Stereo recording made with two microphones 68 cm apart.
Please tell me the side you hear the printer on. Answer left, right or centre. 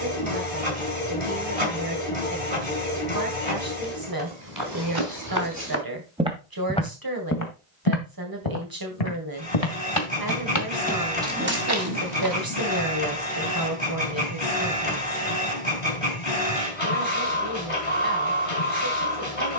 left.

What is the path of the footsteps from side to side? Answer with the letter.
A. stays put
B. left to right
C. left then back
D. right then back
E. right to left
C.